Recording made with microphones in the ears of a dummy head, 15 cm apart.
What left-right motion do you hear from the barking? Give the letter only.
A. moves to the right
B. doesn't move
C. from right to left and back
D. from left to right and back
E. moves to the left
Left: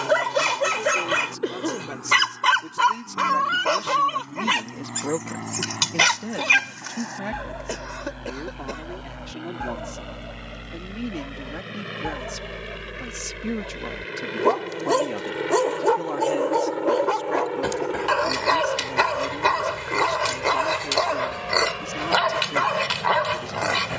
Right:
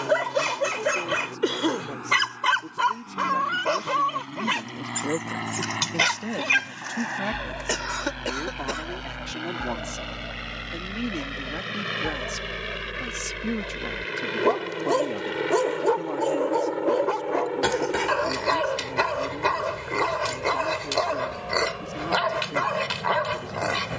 B.